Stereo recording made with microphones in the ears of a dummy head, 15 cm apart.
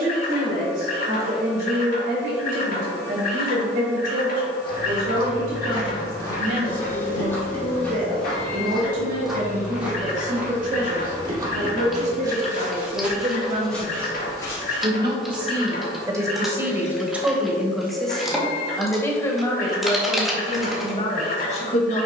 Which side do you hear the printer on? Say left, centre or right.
left.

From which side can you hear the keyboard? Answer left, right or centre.
centre.